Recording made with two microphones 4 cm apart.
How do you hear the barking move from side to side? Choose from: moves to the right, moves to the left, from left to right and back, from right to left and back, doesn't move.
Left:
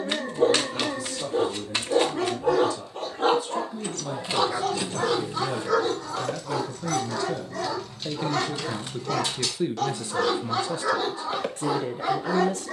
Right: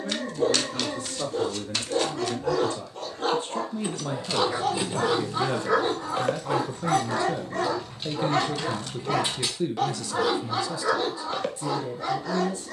from left to right and back.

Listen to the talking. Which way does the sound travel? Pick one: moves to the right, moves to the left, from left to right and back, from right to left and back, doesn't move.
moves to the left.